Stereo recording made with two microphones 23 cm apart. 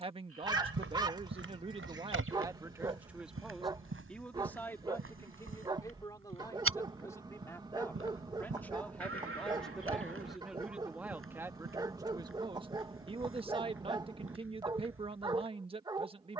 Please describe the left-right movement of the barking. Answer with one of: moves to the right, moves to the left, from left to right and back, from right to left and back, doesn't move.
doesn't move.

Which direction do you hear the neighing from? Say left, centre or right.
right.